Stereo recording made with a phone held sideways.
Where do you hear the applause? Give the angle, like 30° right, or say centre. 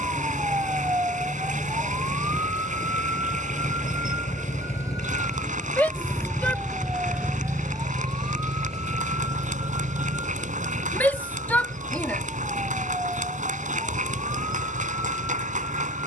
60° right.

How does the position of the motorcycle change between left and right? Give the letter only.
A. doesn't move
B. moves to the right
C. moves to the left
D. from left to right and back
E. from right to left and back
B.